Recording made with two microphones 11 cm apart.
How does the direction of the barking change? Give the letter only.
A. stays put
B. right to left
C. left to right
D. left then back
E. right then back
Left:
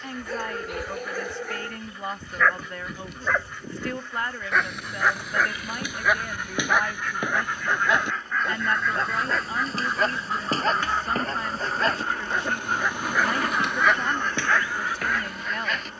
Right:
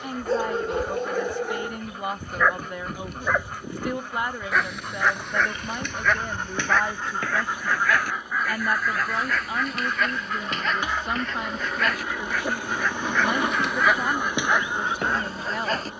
D.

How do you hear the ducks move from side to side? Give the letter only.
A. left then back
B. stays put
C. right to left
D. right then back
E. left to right
A.